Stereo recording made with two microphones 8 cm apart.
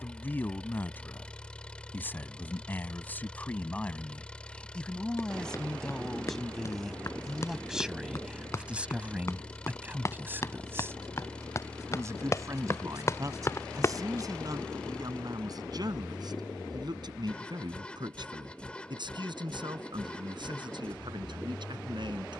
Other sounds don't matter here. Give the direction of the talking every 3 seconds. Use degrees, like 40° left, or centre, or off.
20° left, 10° left, centre, 20° right, 40° right, 50° right, 60° right, 60° right.